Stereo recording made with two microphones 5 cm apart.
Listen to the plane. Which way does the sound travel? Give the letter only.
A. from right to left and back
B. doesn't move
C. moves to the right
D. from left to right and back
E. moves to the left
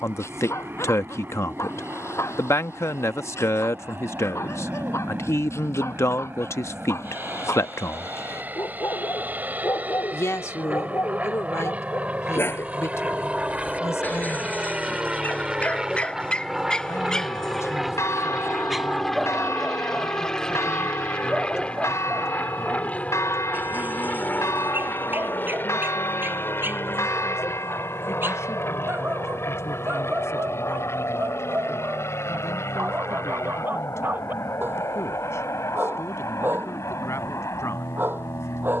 E.